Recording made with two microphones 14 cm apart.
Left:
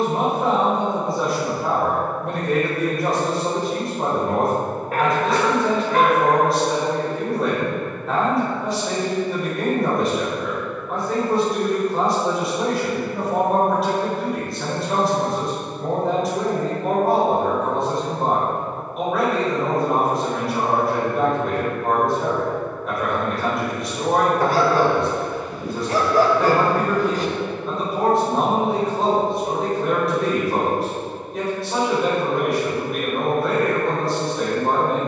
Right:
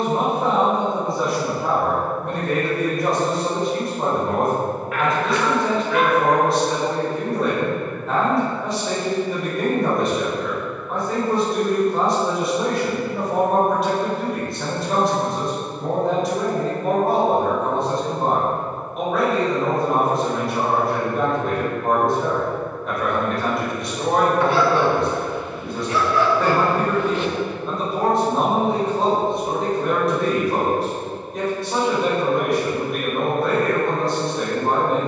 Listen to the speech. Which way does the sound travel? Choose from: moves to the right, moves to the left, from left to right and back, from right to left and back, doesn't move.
doesn't move.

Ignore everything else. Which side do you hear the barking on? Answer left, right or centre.
left.